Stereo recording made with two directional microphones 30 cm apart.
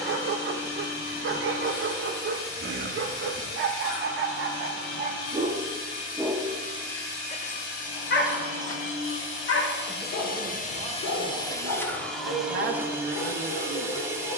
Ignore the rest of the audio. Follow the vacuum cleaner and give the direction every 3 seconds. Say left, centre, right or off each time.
left, left, left, left, centre.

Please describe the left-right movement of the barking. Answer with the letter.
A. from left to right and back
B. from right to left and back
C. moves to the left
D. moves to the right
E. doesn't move
C.